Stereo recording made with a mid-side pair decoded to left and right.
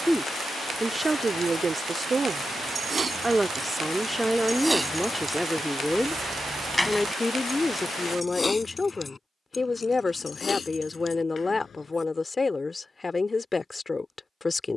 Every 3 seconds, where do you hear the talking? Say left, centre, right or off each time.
right, centre, left, left, left.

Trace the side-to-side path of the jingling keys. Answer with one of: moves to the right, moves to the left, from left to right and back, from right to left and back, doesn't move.
moves to the left.